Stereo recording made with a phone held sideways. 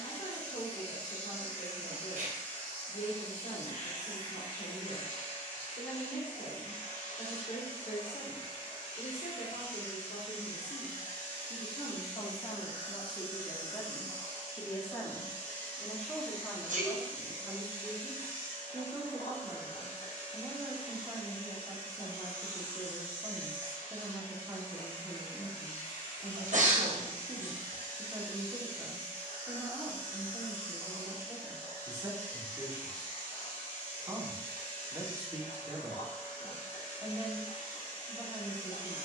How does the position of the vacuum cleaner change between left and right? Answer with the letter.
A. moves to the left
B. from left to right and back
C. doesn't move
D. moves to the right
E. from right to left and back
C.